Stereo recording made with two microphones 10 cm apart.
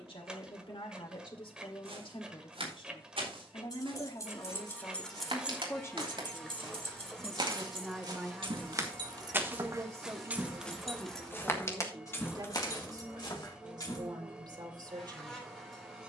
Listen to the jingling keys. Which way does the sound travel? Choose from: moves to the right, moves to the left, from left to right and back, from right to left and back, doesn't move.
from left to right and back.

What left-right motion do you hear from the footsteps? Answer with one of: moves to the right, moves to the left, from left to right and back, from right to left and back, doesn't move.
moves to the left.